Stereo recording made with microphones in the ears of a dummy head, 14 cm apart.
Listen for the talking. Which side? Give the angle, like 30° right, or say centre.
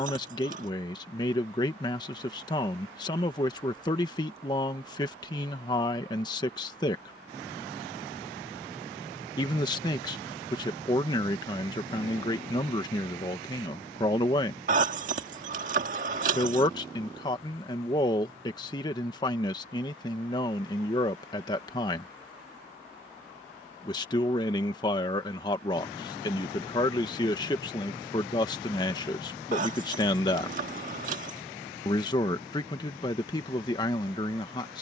30° left.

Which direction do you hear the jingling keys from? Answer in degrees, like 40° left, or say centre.
50° right.